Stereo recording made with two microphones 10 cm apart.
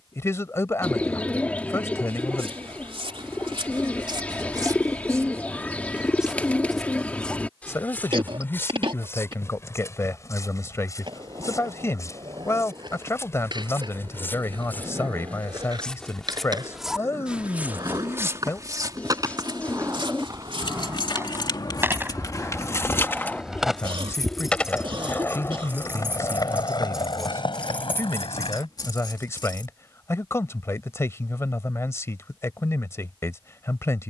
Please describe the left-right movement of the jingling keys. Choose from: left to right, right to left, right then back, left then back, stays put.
right then back.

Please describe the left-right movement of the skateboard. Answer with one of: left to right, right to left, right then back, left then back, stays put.
right to left.